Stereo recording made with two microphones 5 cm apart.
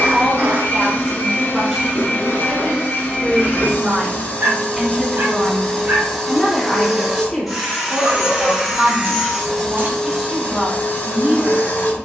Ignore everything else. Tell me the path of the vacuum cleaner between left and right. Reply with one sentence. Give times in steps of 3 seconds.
In this clip you hear the vacuum cleaner on the left from 0 s, in the centre from 6 s and on the left from 9 s.